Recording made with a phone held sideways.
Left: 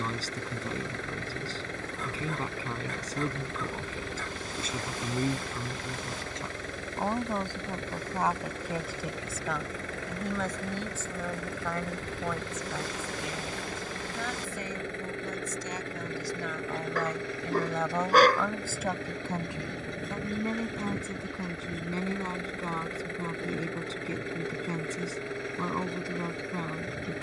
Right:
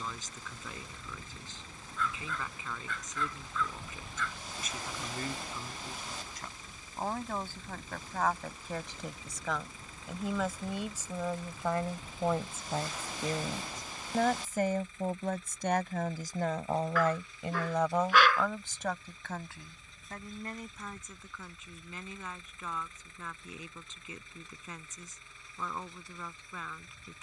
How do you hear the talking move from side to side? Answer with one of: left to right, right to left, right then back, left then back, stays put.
right then back.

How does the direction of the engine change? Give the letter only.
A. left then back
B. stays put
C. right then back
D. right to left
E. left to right
B.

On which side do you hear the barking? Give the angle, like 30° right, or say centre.
40° left.